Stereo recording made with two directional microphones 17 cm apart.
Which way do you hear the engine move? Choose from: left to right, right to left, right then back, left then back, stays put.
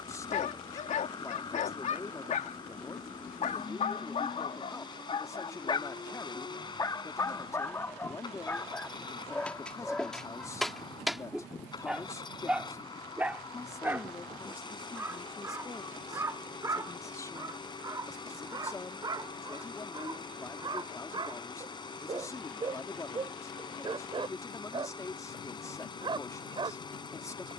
stays put.